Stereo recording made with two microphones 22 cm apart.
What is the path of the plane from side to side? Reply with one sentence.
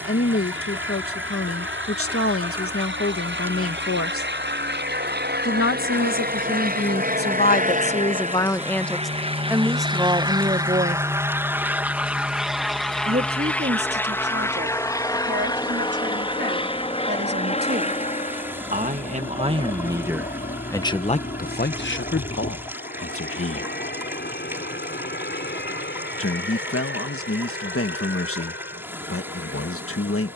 In this clip you hear the plane move from right to left.